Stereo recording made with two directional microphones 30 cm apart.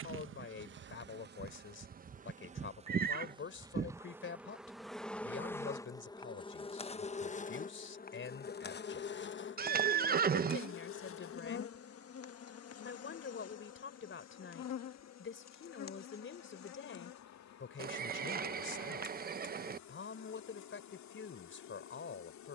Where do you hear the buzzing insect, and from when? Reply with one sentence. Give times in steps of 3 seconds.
You can hear the buzzing insect on the right from 0 s, in the centre from 3 s and on the left from 6 s.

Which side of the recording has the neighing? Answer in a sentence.
You can hear the neighing on the right.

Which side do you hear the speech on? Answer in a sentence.
In this clip you hear the speech on the left.